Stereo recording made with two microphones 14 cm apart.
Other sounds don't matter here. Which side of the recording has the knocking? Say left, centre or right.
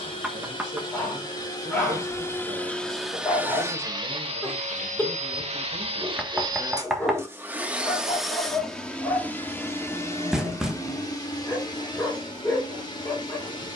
centre.